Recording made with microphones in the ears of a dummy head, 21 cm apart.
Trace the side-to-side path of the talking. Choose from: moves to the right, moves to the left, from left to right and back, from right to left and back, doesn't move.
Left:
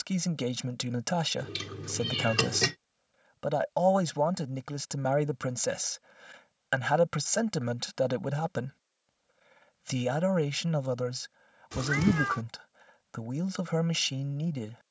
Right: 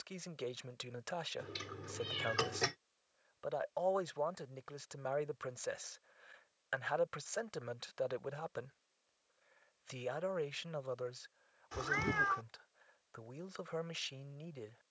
doesn't move.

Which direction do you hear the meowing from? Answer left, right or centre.
left.